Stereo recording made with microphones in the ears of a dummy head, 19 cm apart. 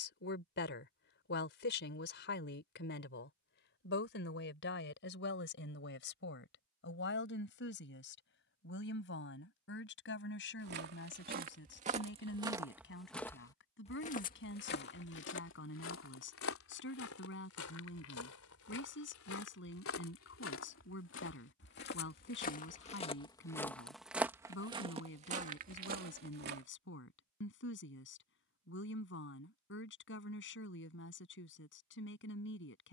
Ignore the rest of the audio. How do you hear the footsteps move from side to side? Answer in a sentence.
You can hear the footsteps move from right to left and back again.